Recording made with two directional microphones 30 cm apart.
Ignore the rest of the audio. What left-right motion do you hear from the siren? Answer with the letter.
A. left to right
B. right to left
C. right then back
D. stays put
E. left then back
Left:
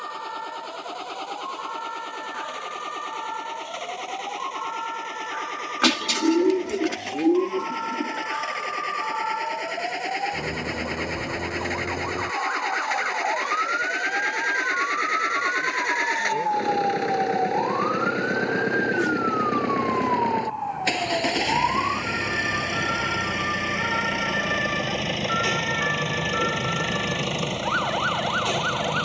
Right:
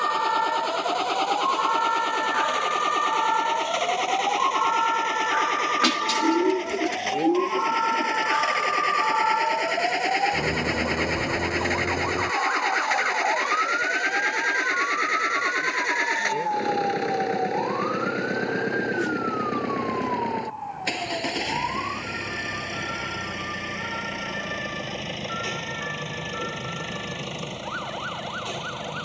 B.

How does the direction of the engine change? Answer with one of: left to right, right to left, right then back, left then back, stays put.
right to left.